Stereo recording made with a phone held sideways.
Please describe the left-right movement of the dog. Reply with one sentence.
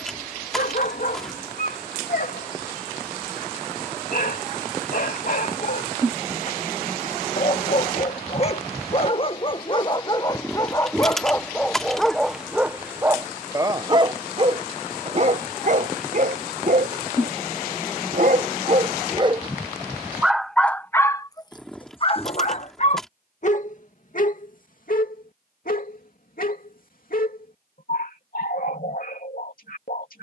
In this clip you hear the dog move from left to right and back again.